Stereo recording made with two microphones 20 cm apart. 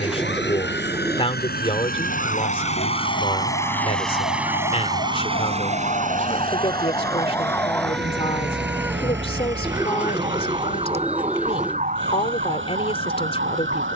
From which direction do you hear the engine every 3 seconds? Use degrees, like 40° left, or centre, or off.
50° left, 10° right, 50° right, 70° right, 70° right.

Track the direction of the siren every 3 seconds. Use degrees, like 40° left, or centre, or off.
70° left, 50° left, 10° left, 30° right, 50° right.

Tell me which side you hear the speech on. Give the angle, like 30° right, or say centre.
30° left.